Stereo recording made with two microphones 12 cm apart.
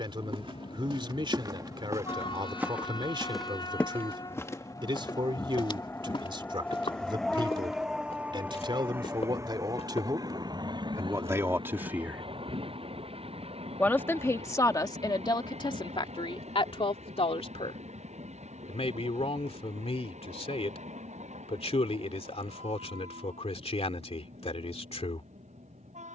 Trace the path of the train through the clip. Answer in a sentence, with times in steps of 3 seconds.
You can hear the train on the left from 0 s, in the centre from 6 s and on the right from 9 s.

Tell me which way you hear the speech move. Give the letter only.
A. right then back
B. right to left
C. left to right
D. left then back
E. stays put
B.